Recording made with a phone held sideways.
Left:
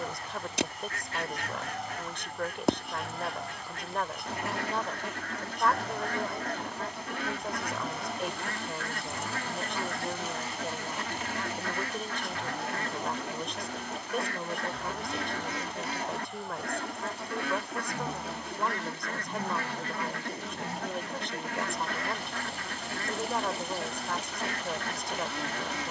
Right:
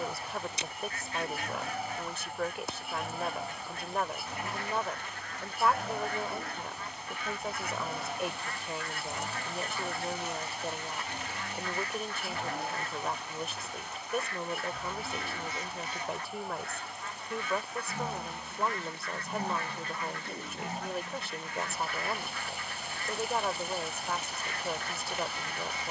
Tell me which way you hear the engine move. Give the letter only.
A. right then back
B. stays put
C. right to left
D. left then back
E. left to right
B.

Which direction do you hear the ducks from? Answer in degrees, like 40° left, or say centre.
70° left.